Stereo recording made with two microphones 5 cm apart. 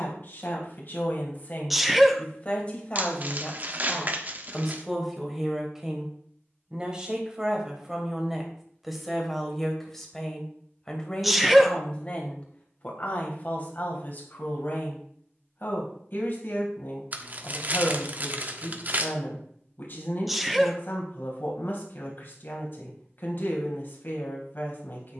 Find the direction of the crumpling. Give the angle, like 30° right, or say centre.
40° right.